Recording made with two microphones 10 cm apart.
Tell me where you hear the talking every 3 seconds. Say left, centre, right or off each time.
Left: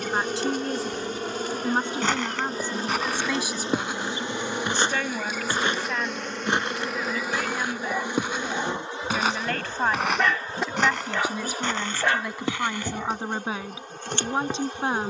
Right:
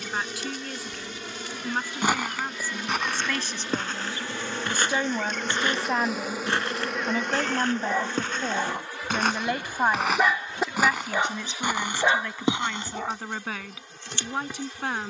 left, centre, right, centre, left.